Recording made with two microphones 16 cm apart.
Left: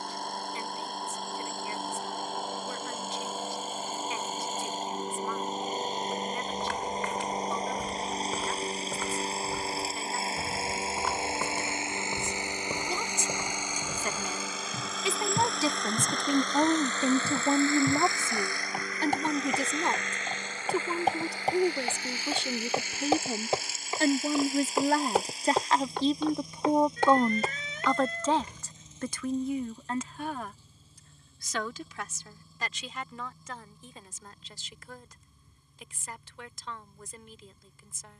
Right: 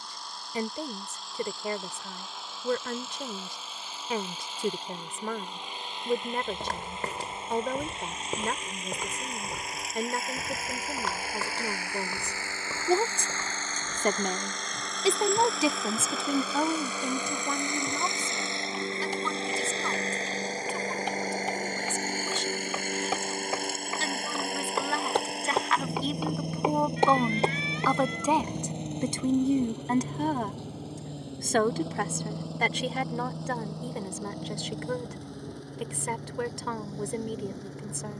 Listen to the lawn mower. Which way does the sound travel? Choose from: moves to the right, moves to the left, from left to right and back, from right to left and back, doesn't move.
moves to the right.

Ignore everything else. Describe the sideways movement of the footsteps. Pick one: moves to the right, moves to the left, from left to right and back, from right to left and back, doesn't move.
from right to left and back.